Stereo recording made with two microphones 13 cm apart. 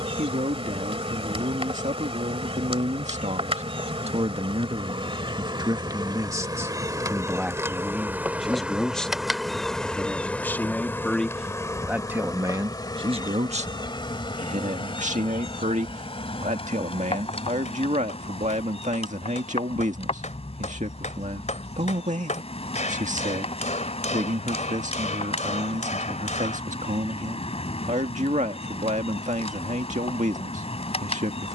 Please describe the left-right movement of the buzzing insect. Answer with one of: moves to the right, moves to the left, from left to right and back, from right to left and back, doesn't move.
moves to the left.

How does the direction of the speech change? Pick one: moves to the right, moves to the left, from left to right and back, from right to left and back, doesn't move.
from right to left and back.